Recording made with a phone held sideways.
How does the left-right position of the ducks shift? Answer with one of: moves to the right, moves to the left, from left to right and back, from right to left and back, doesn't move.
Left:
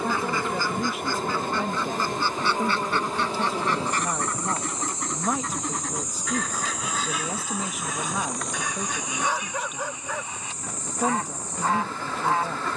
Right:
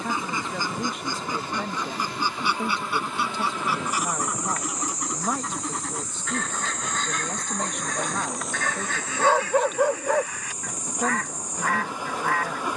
moves to the left.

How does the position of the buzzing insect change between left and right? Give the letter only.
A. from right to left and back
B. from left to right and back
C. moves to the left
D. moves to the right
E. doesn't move
D.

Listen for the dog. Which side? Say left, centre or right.
right.